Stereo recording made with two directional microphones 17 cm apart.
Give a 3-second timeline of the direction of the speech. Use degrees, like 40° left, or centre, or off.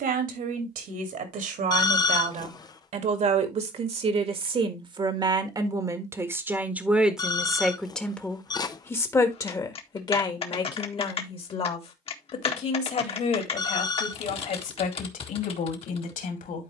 60° right, 30° right, centre, 30° left, 50° left, 60° left.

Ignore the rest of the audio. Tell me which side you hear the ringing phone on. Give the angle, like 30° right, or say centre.
20° left.